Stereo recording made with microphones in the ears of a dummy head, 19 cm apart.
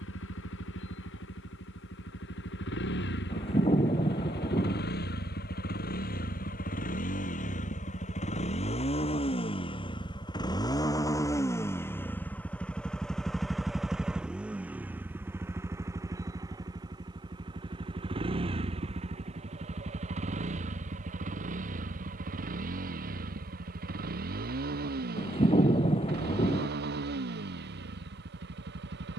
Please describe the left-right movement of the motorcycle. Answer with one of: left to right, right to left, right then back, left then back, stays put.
left to right.